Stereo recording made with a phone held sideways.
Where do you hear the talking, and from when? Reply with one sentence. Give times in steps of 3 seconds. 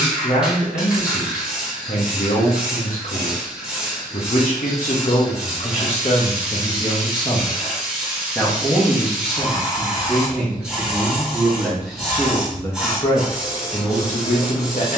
In this clip you hear the talking on the left from 0 s, in the centre from 9 s and on the left from 12 s.